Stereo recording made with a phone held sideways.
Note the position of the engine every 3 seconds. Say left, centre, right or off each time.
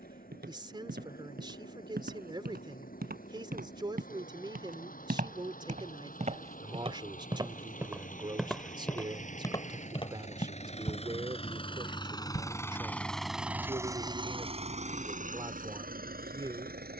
left, left, left, left, centre, right.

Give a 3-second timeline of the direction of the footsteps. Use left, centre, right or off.
right, right, right, left, off, off.